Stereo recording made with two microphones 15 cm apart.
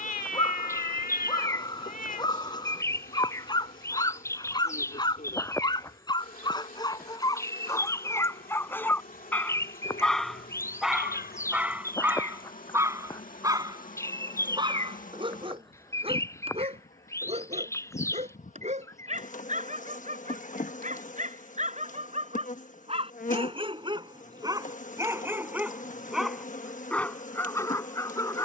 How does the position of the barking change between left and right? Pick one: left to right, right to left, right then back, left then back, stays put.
right then back.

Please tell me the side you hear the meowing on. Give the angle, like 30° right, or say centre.
70° left.